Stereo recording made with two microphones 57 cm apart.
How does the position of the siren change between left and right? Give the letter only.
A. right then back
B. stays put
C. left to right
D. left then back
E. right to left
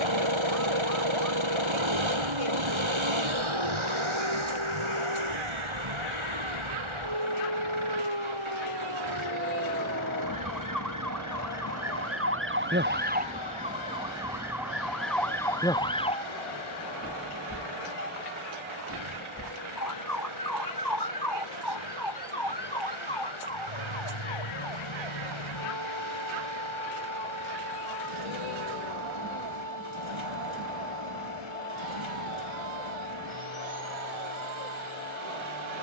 E.